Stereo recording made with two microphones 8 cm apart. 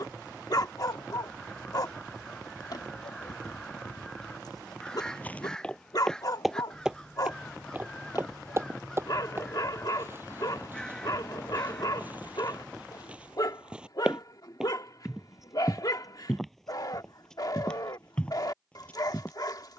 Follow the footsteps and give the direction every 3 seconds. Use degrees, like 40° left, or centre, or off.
off, 20° left, 20° right, 30° right, 20° right, centre, 20° left.